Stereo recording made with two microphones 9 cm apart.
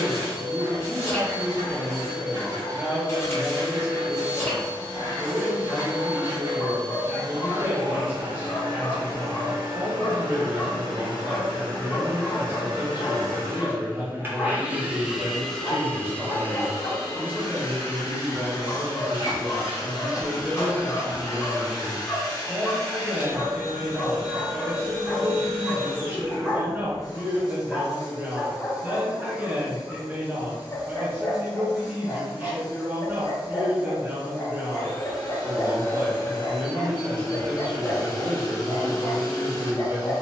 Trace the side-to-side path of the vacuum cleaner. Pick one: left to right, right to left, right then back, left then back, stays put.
right to left.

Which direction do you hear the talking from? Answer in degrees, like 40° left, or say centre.
20° right.